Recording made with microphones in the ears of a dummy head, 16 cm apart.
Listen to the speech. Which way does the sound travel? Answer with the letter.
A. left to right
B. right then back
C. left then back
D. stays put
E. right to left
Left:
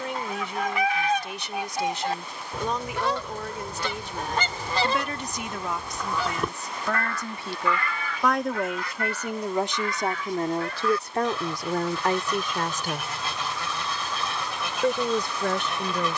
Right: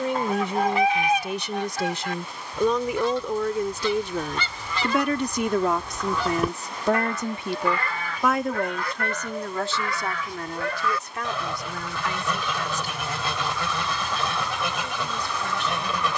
E.